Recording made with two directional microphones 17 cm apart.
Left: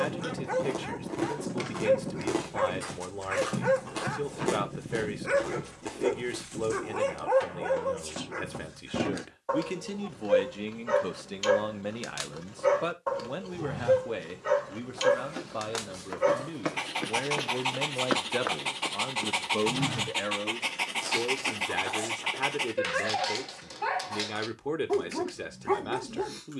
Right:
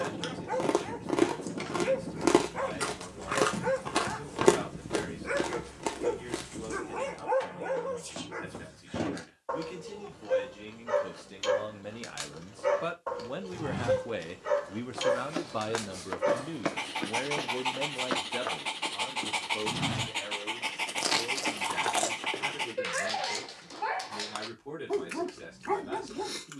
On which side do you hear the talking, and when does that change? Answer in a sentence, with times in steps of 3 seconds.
You can hear the talking on the left from 0 s, in the centre from 12 s and on the left from 18 s.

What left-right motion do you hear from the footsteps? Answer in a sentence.
You can hear the footsteps move from right to left and back again.